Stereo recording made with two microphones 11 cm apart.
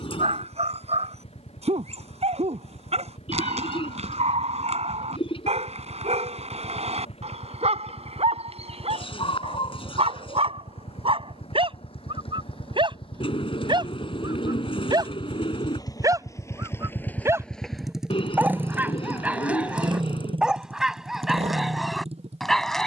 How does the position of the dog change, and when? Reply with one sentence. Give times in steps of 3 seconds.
In this clip you hear the dog on the right from 0 s and in the centre from 18 s.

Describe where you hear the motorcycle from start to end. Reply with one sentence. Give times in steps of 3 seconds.
In this clip you hear the motorcycle on the left from 0 s and on the right from 18 s.